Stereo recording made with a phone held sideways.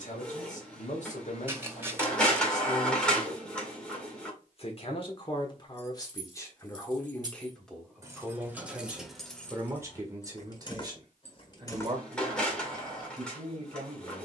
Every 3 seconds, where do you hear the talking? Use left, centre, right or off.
left, left, centre, right, right.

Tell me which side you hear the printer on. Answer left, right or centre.
centre.